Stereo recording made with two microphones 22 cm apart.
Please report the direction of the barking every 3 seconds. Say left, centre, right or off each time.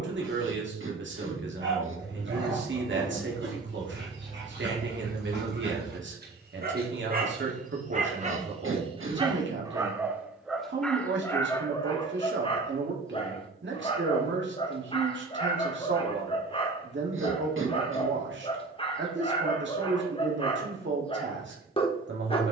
right, right, right, centre, left, left, left, left.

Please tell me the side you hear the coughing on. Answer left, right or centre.
right.